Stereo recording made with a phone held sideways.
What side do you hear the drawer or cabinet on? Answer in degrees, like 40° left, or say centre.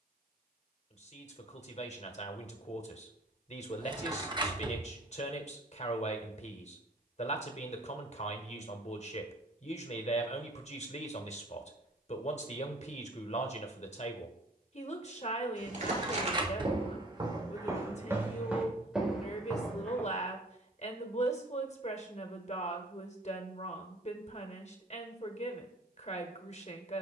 30° right.